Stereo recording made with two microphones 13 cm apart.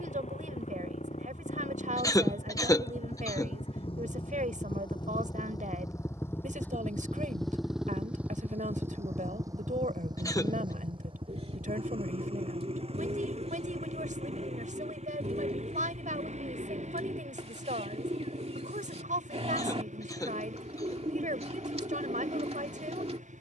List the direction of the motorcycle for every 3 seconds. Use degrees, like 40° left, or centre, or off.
60° left, 40° left, centre, 40° right, 50° right, 60° right, 70° right, 70° right.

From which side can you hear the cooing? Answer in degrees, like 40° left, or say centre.
60° right.